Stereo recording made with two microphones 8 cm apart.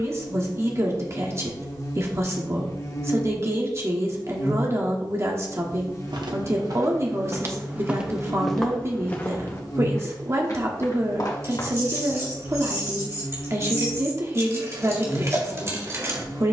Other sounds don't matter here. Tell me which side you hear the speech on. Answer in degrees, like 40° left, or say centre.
40° right.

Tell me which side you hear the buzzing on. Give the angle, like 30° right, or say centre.
40° left.